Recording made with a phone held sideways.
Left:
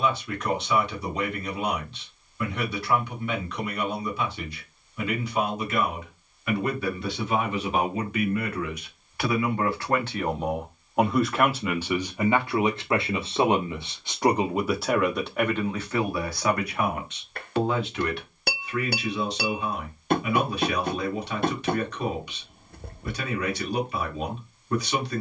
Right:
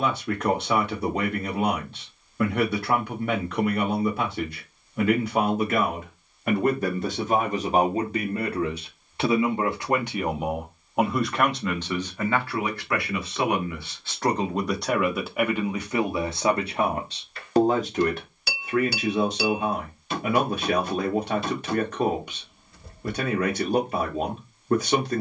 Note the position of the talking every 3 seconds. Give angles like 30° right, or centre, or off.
50° right, 50° right, 40° right, 10° right, 20° left, 20° right, 50° right, 50° right, 50° right.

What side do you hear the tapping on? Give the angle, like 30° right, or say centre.
60° left.